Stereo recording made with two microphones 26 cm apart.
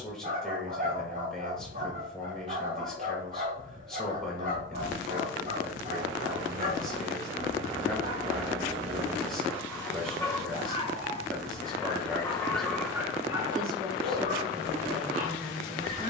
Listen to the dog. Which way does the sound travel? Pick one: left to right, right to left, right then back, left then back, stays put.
left then back.